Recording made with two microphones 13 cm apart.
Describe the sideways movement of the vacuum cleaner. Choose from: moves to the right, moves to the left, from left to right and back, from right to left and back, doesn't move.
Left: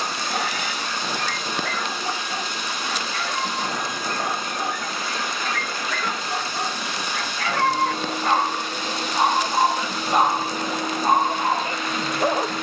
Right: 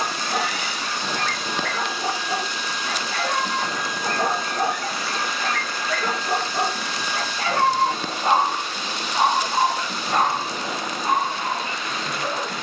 doesn't move.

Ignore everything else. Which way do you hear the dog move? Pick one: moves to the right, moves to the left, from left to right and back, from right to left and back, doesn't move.
moves to the left.